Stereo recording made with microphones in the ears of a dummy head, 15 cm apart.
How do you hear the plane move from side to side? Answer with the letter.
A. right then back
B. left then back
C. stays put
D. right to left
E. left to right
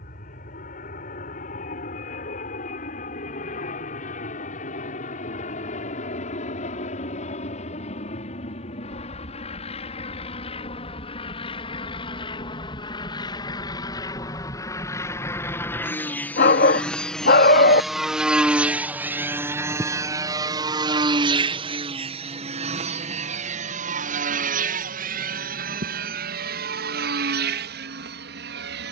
E.